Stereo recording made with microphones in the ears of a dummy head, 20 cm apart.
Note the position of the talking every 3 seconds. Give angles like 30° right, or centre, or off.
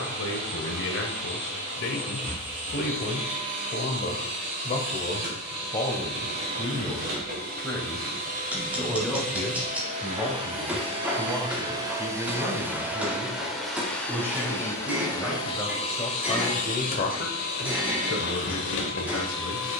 60° left, 30° left, 10° left, 10° right, 10° right, 20° left, 60° left.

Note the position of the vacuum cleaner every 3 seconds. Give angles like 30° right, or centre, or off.
50° right, 50° right, 40° right, 30° right, centre, 30° left, 60° left.